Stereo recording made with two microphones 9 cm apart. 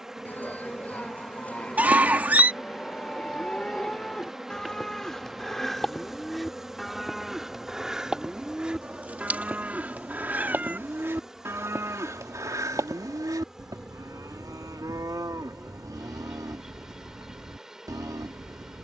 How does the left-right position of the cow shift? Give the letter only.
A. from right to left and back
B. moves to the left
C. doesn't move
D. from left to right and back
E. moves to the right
E.